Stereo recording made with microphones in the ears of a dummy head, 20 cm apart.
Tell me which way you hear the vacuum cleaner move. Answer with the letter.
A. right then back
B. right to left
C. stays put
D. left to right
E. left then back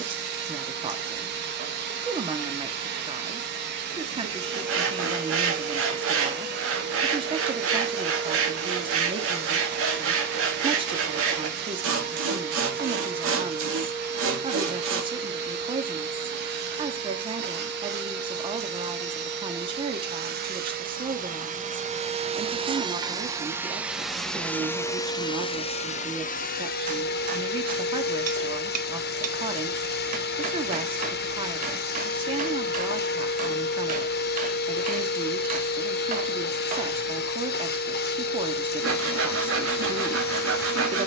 B.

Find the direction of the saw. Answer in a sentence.
In this clip you hear the saw on the right.